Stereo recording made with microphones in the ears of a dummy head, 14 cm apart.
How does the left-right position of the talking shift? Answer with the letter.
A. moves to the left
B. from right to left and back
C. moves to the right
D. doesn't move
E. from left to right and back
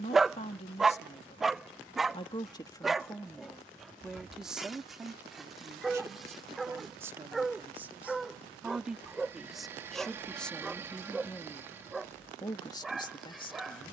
E.